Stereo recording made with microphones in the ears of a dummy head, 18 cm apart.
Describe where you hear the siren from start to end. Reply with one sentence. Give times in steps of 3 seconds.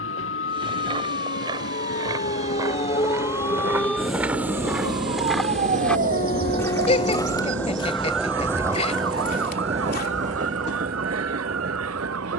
You can hear the siren on the left from 0 s, in the centre from 3 s and on the right from 6 s.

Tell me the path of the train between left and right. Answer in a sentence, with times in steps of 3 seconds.
In this clip you hear the train on the left from 0 s, in the centre from 6 s and on the right from 9 s.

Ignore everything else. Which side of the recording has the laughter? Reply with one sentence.
You can hear the laughter on the left.